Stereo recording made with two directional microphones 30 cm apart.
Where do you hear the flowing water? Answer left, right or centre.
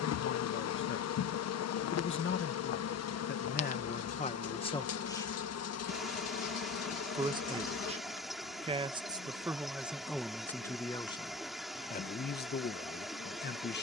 centre.